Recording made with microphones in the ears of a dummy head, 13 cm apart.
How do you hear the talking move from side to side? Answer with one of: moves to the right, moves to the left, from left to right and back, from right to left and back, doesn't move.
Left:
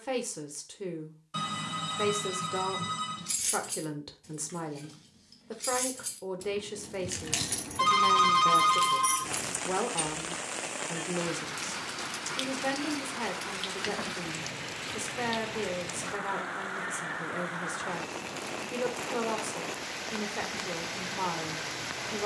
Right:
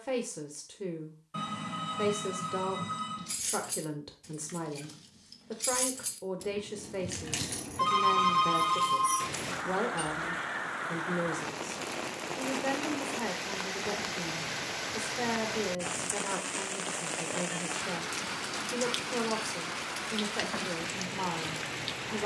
doesn't move.